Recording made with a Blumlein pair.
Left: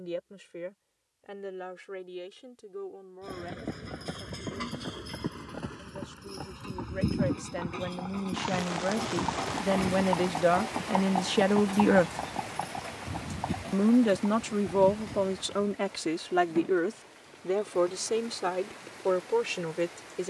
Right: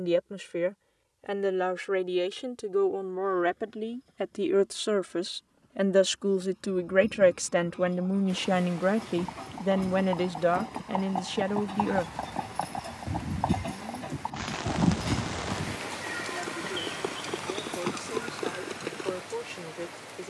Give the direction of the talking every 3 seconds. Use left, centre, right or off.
right, right, right, centre, left, left, left.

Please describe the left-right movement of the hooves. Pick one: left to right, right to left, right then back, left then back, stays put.
left to right.